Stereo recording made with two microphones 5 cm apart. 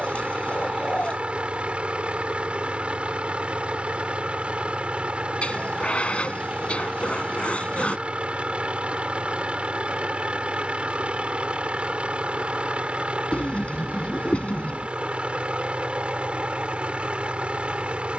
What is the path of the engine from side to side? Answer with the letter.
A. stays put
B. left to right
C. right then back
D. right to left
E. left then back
A.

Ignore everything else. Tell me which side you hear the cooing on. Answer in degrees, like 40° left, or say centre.
30° left.